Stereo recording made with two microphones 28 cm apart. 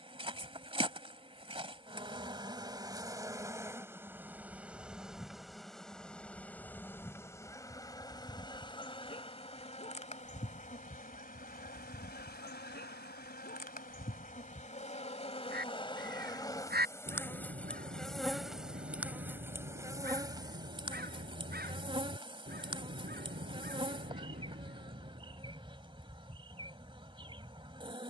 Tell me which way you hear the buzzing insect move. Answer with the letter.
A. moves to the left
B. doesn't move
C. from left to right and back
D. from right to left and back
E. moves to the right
D.